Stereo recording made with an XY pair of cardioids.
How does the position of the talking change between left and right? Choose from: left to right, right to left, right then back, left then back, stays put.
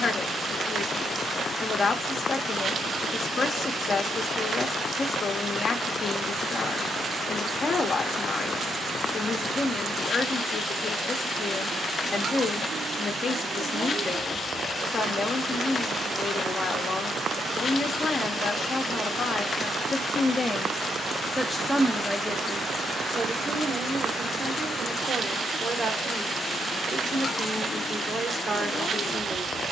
left to right.